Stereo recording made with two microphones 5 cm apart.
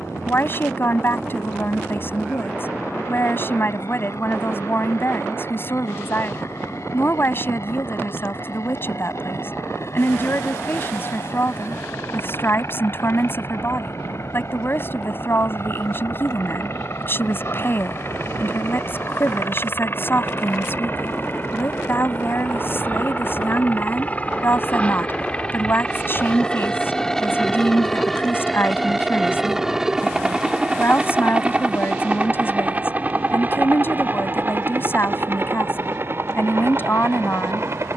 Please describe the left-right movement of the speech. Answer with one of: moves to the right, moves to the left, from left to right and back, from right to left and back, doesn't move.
doesn't move.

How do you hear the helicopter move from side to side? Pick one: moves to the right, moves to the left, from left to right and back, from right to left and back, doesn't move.
moves to the right.